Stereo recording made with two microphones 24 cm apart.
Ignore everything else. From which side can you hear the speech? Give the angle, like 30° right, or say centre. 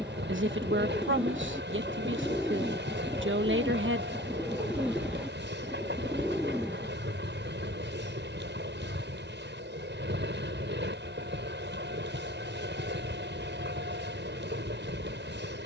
50° right.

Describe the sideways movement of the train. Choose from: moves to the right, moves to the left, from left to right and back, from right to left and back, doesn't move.
doesn't move.